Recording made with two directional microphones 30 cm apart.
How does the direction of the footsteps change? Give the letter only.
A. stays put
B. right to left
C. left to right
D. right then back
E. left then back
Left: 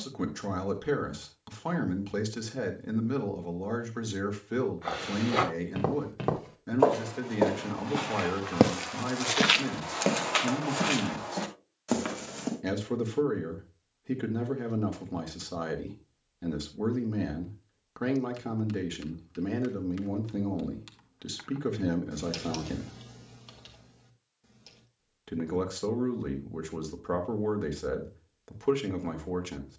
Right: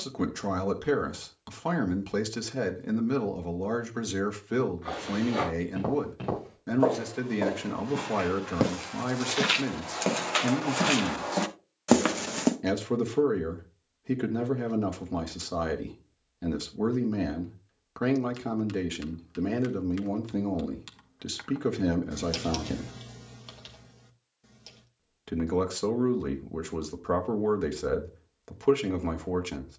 C.